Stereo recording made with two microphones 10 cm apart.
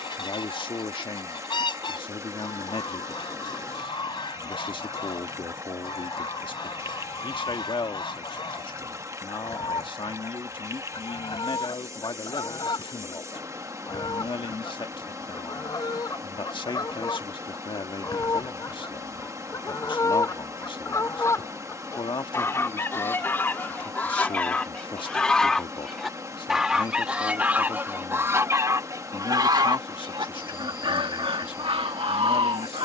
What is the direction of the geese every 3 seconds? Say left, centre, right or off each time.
left, left, left, left, left, left, left, left, centre, right, right.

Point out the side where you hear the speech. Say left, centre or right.
left.